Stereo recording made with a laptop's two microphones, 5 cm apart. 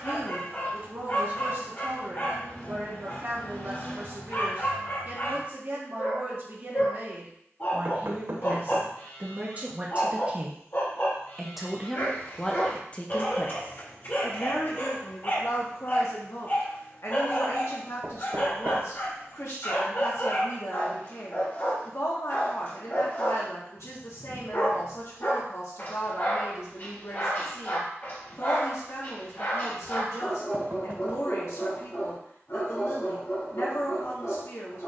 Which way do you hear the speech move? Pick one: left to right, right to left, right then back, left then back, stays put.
right to left.